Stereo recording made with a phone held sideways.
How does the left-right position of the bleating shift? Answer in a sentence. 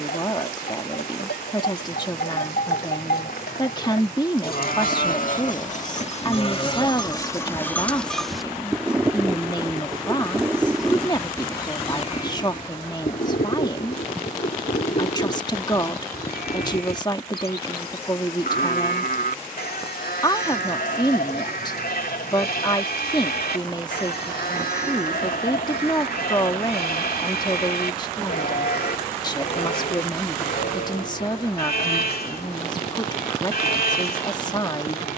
In this clip you hear the bleating move from left to right and back again.